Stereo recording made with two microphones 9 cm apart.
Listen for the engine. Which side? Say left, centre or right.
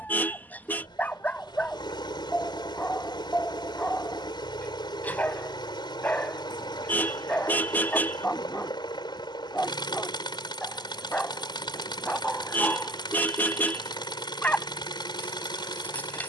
left.